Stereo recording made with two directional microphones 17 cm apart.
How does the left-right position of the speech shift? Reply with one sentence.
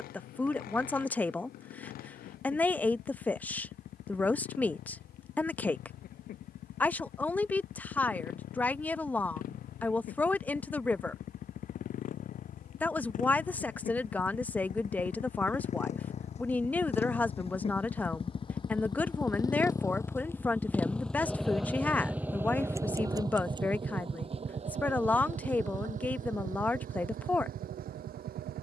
You can hear the speech stay put.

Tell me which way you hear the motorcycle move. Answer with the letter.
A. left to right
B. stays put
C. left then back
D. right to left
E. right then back
A.